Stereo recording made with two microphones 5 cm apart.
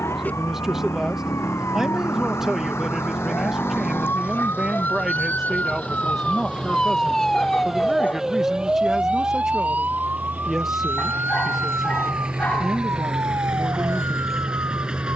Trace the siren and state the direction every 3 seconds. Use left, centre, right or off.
left, left, centre, right, right.